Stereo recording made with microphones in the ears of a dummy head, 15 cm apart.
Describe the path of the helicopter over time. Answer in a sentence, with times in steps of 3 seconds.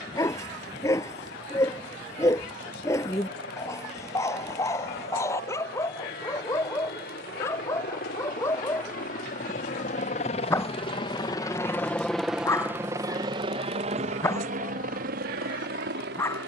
You can hear the helicopter on the left from 0 s and on the right from 12 s.